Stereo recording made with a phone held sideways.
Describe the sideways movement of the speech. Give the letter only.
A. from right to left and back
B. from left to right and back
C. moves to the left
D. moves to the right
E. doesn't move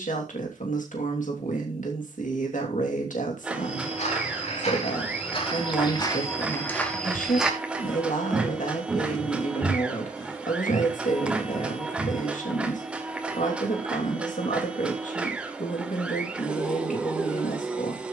E.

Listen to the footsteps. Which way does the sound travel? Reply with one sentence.
You can hear the footsteps move from left to right and back again.